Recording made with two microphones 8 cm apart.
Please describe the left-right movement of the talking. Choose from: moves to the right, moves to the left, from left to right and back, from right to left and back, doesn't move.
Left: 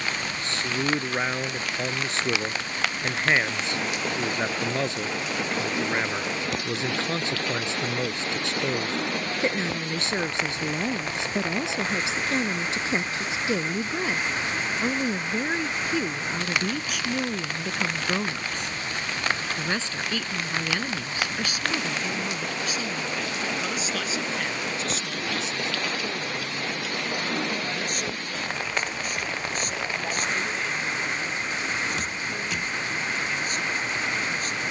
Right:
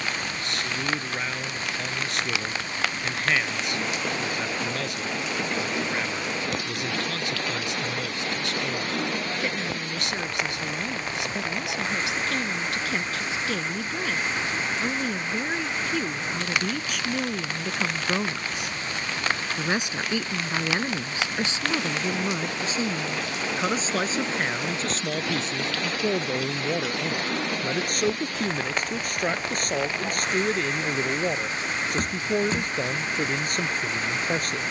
moves to the right.